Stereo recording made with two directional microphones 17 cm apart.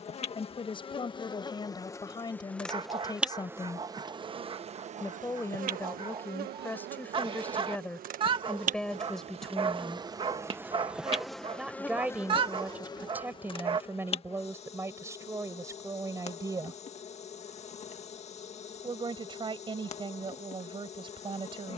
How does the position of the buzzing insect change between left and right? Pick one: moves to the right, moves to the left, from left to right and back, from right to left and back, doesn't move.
from left to right and back.